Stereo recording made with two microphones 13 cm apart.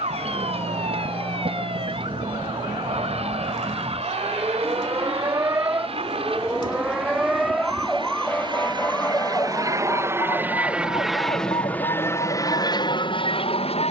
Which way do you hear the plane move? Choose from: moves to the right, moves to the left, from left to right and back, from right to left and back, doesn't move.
moves to the left.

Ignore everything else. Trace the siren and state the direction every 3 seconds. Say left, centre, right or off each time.
right, right, centre, left, left.